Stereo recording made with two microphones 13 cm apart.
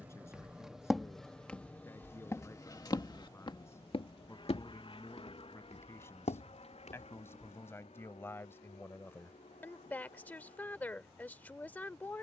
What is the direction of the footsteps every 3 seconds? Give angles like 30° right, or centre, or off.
10° left, 60° left, 80° left, off.